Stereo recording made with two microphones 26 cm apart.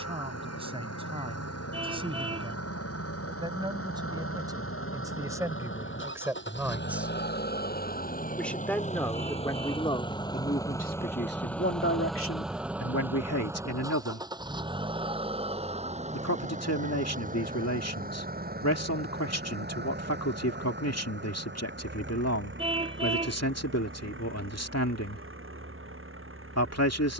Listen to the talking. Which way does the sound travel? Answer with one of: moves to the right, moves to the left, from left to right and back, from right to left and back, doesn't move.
moves to the left.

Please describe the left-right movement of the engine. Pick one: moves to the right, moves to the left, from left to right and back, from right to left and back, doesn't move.
moves to the right.